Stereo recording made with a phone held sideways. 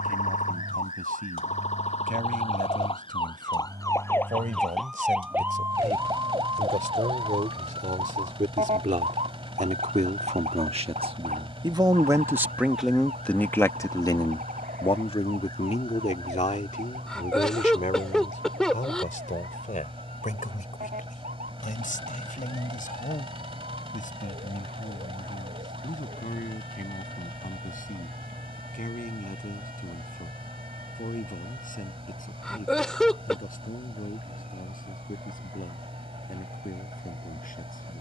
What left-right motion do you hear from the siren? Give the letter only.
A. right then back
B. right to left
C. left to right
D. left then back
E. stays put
C.